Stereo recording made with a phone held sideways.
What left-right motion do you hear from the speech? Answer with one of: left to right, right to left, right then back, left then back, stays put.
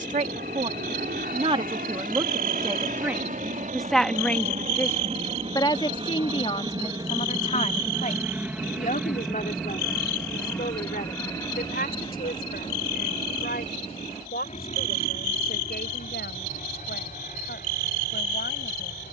right to left.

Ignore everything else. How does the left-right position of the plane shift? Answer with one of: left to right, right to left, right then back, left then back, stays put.
right to left.